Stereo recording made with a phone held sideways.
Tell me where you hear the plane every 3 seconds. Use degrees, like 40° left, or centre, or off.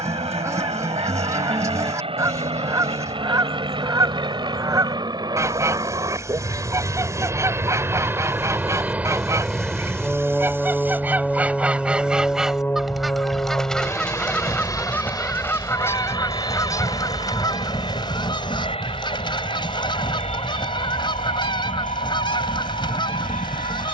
50° right, 30° right, 20° right, centre, 20° left, 30° left, 40° left, 50° left.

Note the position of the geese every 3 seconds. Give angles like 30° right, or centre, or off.
20° right, 20° right, 20° right, 20° right, centre, 20° left, 30° left, 30° left.